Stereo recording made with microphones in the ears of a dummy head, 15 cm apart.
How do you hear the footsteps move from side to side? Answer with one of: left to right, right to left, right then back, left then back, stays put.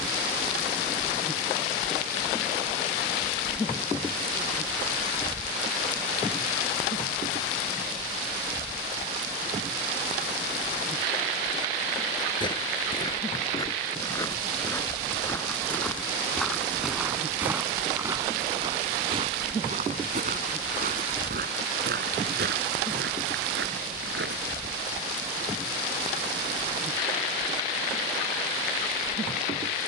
left to right.